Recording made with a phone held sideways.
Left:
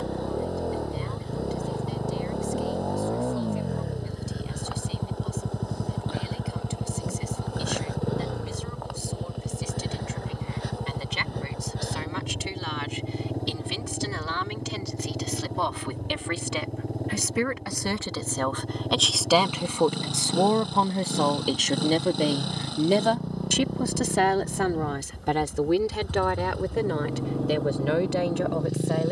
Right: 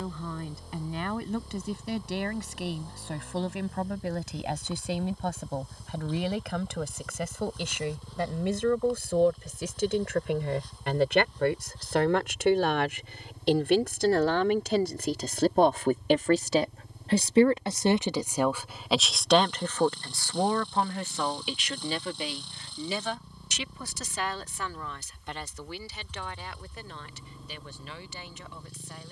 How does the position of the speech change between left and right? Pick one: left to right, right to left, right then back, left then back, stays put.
right to left.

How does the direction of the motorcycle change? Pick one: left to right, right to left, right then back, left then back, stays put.
stays put.